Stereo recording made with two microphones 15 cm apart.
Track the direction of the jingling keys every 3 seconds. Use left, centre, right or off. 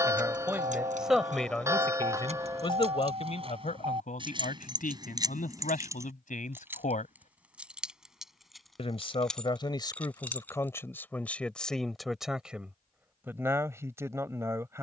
right, right, centre, centre, off.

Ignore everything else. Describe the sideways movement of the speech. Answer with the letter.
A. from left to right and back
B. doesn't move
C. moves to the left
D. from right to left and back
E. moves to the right
D.